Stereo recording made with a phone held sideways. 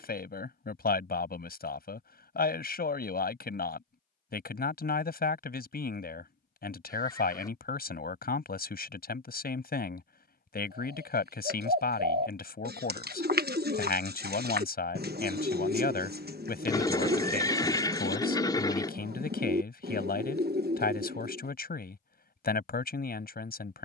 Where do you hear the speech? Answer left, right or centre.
left.